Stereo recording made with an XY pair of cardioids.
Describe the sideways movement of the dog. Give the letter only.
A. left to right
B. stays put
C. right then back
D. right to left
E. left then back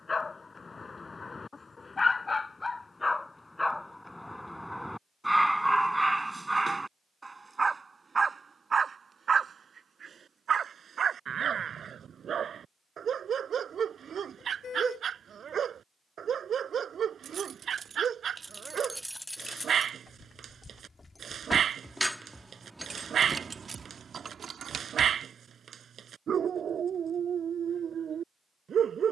A.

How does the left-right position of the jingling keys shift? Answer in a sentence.
You can hear the jingling keys move from right to left and back again.